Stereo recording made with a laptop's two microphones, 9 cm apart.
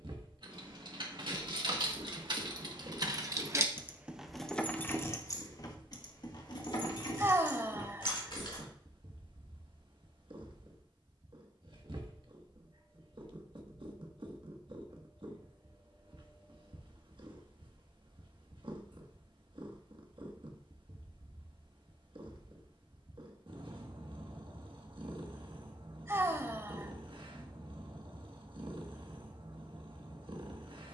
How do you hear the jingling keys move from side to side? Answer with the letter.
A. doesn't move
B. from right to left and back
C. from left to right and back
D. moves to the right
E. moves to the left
E.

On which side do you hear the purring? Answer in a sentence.
In this clip you hear the purring on the right.